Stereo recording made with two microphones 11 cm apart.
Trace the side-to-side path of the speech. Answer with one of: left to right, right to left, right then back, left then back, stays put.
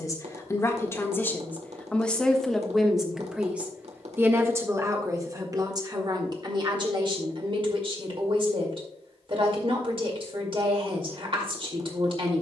left to right.